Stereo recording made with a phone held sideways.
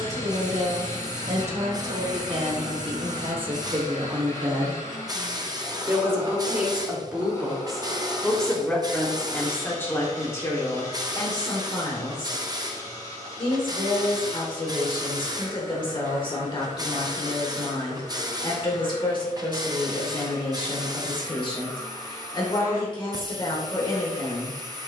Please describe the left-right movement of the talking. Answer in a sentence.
In this clip you hear the talking move to the left.